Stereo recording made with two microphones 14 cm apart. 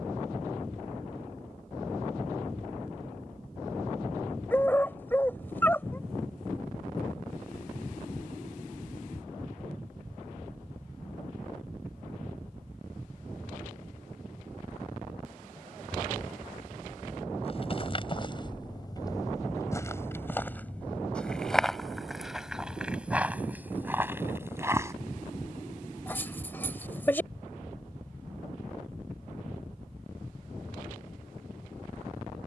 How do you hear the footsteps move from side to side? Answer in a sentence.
You can hear the footsteps move to the right.